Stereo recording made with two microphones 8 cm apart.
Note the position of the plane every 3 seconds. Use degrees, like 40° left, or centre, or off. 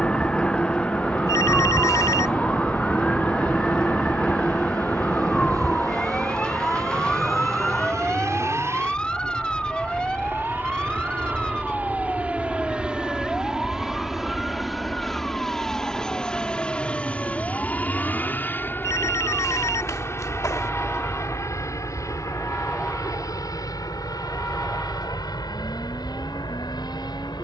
60° right, 50° right, 40° right, 30° right, 10° right, 10° left, 30° left, 40° left, 50° left.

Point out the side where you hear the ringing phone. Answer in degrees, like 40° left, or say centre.
40° left.